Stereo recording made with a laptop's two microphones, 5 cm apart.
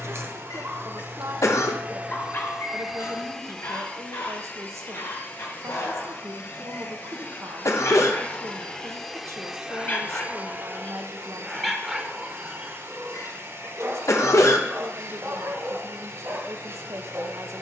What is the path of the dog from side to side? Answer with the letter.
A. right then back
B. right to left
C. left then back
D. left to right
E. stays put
C.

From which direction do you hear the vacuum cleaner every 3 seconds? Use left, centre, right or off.
right, left, left, right, right, right.